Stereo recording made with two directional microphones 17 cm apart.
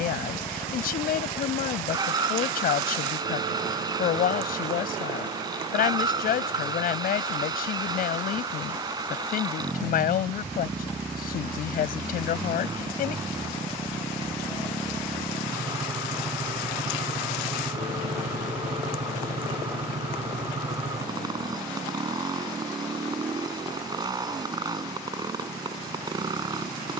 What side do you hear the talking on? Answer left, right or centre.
left.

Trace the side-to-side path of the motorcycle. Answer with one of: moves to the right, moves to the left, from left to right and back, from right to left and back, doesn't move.
doesn't move.